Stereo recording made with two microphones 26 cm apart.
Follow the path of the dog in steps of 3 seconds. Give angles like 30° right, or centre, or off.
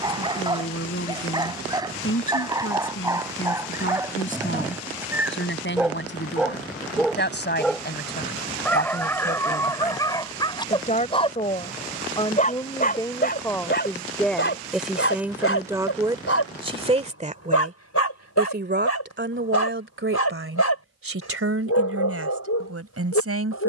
20° right, 10° right, centre, 20° left, 40° left, 60° left, 80° left, 80° left.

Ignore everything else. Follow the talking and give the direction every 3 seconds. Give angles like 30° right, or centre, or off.
50° left, 50° left, 40° left, 30° left, 10° left, 20° right, 50° right, 60° right.